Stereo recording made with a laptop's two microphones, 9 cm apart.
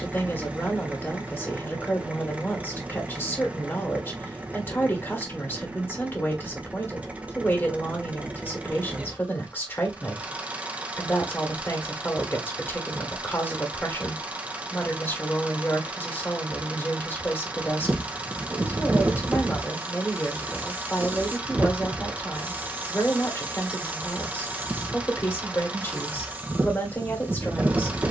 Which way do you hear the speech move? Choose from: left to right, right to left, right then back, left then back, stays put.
stays put.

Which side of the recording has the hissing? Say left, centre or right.
right.